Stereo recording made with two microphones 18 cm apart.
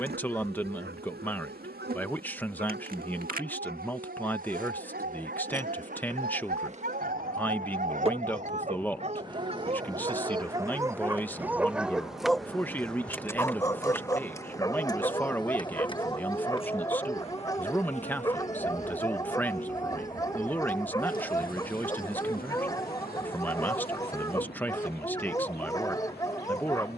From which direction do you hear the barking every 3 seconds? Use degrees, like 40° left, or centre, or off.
70° right, 70° right, 50° right, 20° right, 20° left, 20° left, 20° left, 20° left, 20° left.